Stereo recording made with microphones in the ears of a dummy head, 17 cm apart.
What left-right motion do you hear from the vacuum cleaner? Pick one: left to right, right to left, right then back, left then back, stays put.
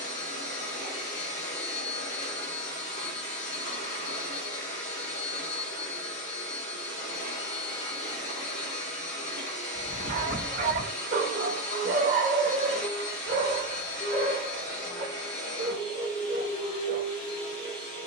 stays put.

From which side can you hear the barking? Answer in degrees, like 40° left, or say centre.
40° right.